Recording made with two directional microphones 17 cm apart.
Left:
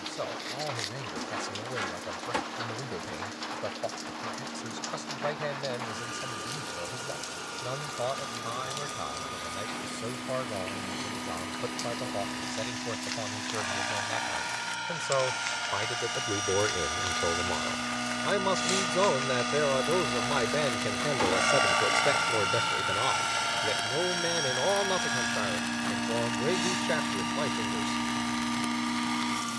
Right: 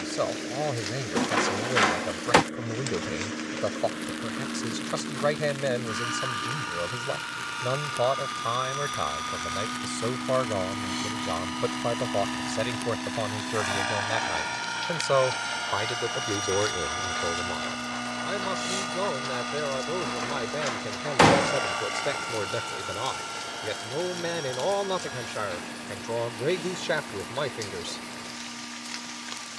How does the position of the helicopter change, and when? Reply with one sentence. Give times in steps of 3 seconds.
You can hear the helicopter on the right from 0 s, in the centre from 15 s and on the left from 21 s.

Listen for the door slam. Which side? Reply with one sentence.
You can hear the door slam on the right.